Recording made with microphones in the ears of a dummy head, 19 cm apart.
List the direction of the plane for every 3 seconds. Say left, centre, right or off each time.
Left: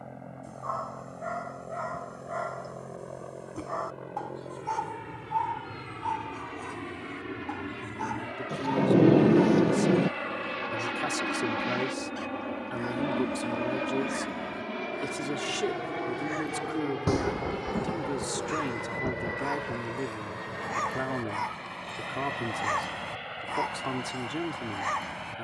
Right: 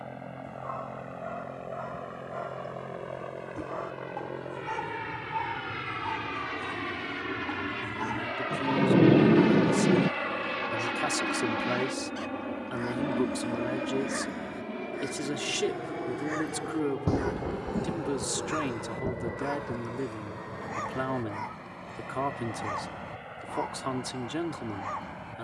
right, right, right, centre, left, left, left, left, left.